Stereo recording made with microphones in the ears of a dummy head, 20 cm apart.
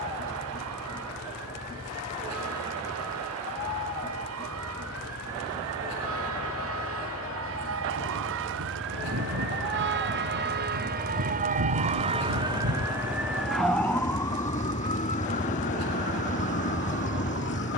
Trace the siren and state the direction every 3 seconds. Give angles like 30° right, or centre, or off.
80° right, 80° right, 70° right, 50° right, centre, 40° left.